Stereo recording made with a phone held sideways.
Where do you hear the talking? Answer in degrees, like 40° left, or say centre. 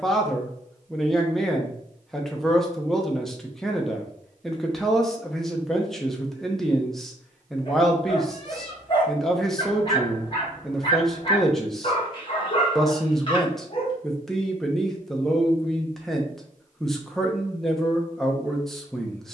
centre.